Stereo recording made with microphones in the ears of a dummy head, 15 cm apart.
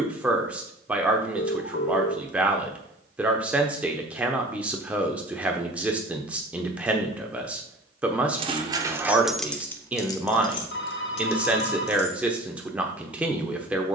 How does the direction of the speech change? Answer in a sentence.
In this clip you hear the speech stay put.